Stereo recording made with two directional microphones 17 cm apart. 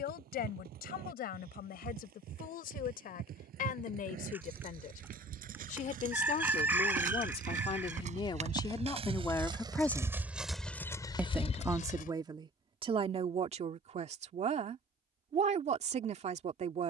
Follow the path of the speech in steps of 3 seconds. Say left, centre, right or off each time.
left, left, left, centre, right, right.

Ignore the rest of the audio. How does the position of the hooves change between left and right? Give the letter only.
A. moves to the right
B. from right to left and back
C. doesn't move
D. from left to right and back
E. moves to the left
E.